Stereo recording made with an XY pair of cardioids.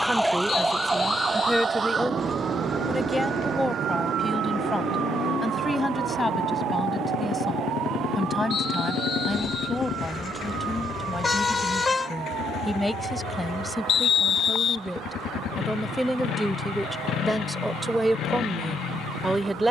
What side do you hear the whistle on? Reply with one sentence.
You can hear the whistle on the left.